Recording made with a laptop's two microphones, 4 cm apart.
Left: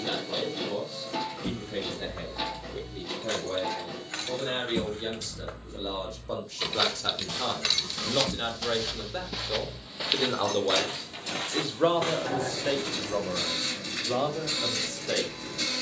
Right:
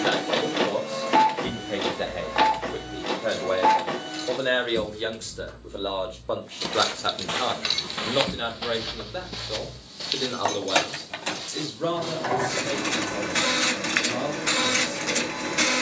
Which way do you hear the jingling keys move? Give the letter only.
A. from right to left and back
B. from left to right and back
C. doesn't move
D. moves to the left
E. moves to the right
E.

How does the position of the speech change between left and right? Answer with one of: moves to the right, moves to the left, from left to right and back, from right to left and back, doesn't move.
moves to the left.